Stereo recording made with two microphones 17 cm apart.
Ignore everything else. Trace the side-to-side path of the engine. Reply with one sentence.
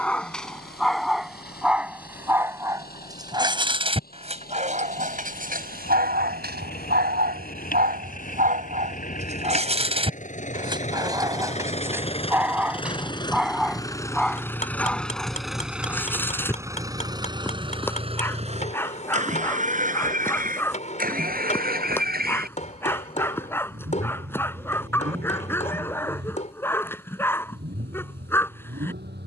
In this clip you hear the engine move to the right.